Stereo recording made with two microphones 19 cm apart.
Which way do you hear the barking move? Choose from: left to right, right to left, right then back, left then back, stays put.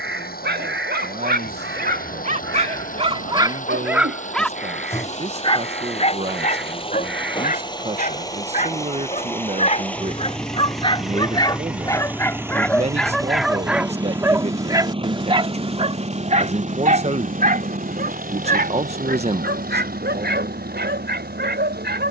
left then back.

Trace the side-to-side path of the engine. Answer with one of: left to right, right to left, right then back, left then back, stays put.
left to right.